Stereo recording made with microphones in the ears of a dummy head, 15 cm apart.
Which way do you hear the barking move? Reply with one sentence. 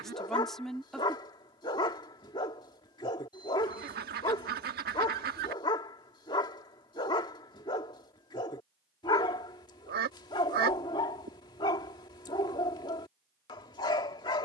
You can hear the barking stay in one place.